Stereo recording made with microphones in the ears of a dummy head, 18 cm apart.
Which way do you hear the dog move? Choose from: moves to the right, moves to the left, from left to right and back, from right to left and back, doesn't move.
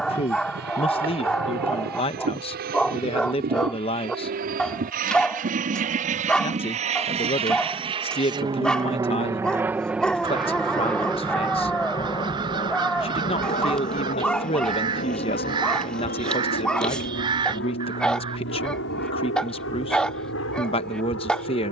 doesn't move.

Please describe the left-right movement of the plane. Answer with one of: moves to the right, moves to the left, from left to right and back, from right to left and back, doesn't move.
moves to the left.